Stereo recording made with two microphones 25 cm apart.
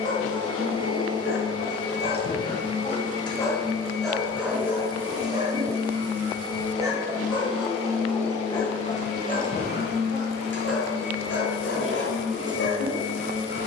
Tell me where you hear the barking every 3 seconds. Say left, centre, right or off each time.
left, centre, centre, left, left.